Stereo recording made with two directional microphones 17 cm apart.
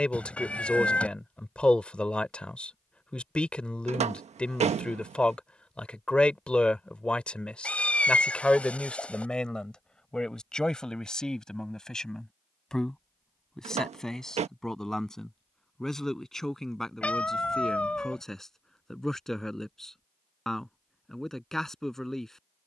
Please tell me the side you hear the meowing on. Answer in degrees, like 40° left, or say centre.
10° left.